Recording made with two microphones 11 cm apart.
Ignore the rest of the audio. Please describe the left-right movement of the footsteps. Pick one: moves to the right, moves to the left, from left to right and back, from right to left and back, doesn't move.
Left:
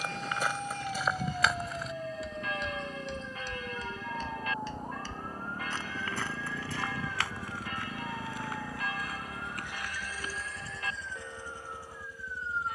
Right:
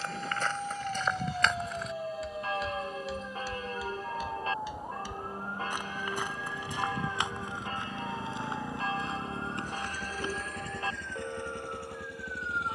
moves to the right.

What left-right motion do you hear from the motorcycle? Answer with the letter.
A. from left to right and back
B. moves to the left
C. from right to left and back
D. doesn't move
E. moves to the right
E.